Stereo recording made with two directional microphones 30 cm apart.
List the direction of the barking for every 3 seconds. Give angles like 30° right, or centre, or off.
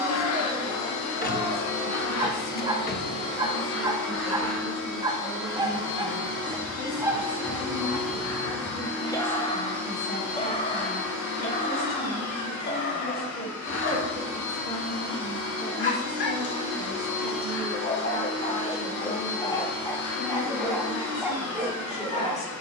10° right, 10° right, 10° right, 20° left, 40° left, 40° left, 10° left, 10° right.